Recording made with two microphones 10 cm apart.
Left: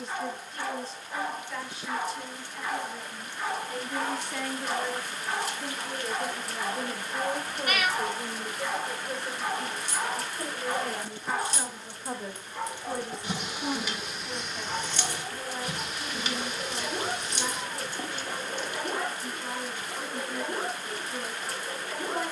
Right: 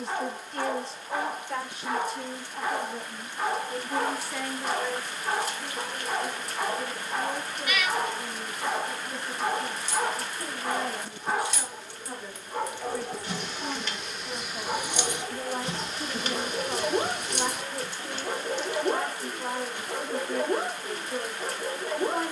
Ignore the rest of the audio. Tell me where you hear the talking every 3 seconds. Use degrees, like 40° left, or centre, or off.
50° right, centre, 50° left, 60° left, 10° left, 60° right, 60° right, 60° right.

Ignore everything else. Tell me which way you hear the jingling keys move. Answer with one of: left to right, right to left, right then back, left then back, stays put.
left to right.